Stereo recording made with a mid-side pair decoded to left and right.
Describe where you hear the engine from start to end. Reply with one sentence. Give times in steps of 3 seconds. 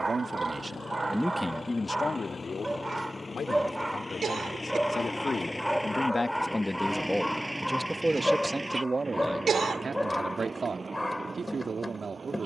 In this clip you hear the engine on the left from 0 s, in the centre from 6 s and on the right from 9 s.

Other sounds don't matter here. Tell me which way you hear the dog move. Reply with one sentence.
You can hear the dog move to the left.